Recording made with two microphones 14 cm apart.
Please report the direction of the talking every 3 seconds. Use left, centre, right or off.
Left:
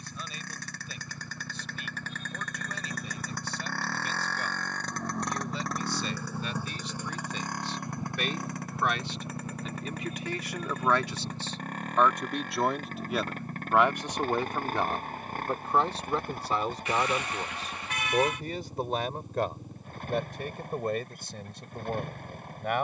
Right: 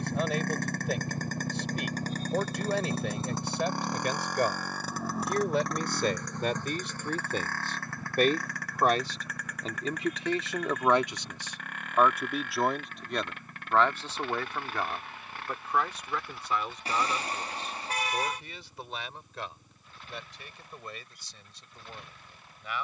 right, right, right, right, centre, left, left, left.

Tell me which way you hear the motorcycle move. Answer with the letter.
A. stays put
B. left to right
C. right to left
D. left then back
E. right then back
C.